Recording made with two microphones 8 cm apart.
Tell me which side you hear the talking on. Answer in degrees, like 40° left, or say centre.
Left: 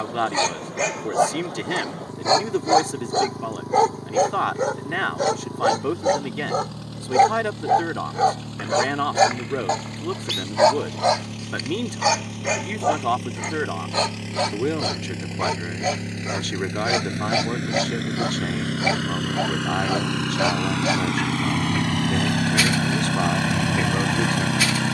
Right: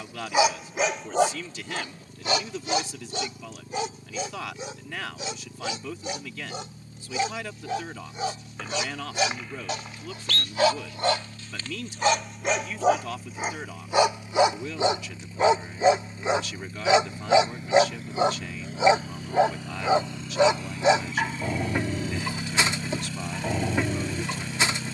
50° left.